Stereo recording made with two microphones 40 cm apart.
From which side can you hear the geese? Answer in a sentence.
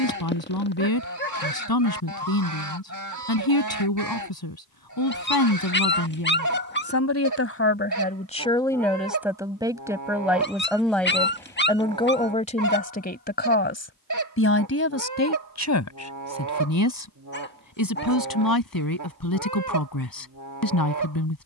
You can hear the geese on the right.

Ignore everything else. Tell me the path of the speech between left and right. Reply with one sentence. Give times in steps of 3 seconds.
You can hear the speech on the left from 0 s, in the centre from 9 s and on the left from 12 s.